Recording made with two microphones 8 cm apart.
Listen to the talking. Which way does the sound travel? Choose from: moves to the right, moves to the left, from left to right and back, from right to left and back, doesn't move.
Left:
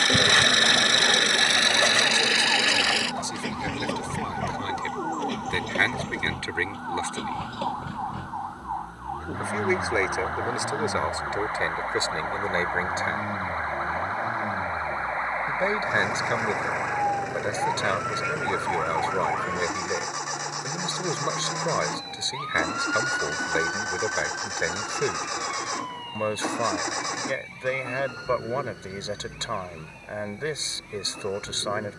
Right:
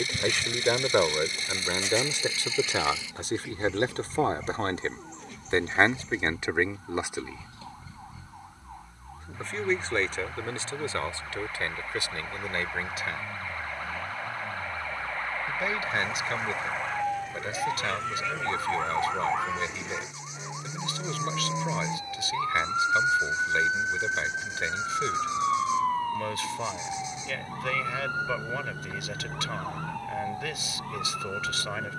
moves to the left.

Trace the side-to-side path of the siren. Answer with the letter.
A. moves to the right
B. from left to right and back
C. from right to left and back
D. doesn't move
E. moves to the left
A.